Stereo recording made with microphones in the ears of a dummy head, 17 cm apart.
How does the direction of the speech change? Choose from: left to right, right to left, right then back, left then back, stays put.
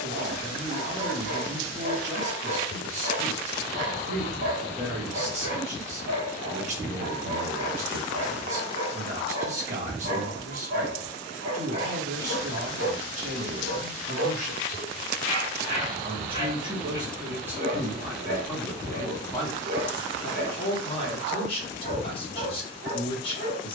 right to left.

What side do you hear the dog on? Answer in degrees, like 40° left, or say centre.
60° right.